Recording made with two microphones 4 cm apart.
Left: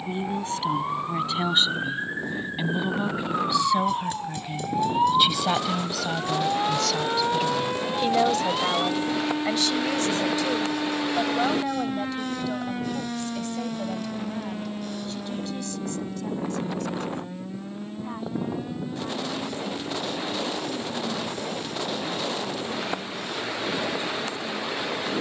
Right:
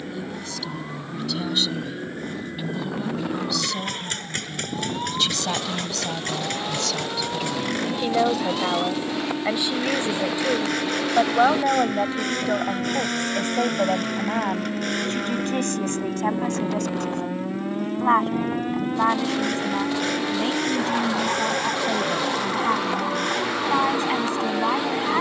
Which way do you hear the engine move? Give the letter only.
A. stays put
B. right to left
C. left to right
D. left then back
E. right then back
A.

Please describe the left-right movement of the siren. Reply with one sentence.
You can hear the siren move from left to right.